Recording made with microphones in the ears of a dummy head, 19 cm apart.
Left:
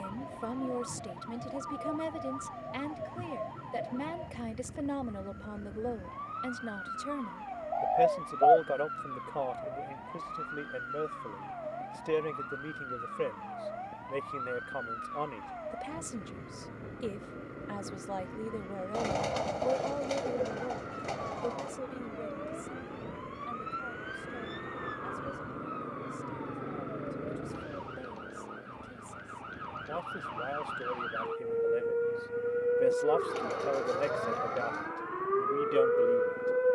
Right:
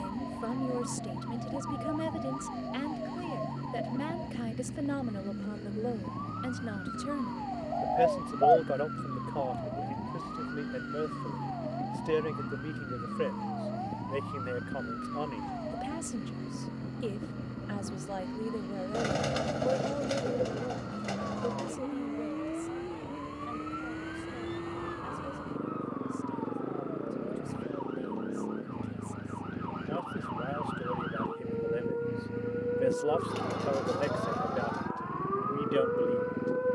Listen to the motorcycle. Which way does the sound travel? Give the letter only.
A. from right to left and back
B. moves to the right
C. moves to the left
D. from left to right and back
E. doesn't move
E.